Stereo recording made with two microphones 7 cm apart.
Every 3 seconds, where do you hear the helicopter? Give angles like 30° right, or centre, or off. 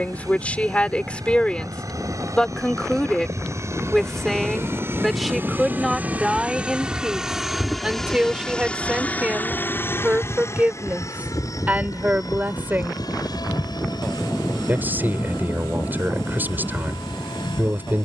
50° right, 40° right, centre, 40° left, 60° left, 70° left.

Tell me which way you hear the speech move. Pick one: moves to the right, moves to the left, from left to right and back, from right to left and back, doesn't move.
moves to the right.